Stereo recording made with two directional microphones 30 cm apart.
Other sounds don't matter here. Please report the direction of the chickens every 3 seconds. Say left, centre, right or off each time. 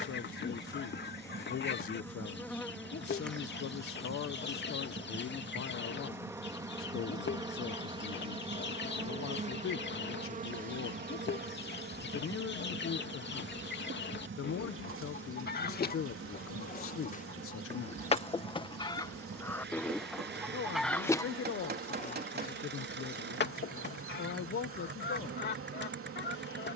left, left, left, left, left, left, centre, left, left.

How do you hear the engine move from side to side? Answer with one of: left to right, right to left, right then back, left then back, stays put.
stays put.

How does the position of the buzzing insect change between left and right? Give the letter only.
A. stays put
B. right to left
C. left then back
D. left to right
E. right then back
D.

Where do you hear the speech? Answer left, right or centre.
left.